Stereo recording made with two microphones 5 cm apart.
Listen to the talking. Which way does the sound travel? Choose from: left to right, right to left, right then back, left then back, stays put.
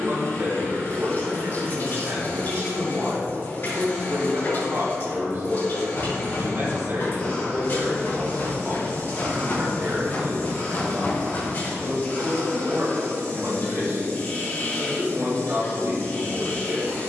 stays put.